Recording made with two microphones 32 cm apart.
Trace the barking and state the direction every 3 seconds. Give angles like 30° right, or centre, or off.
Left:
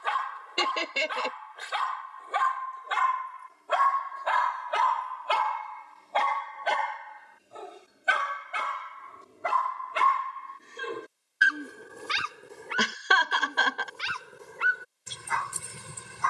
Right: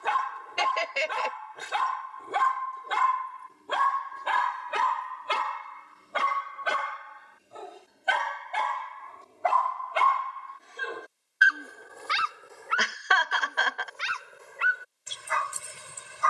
60° right, 40° right, centre, 30° left, 50° left, 50° left.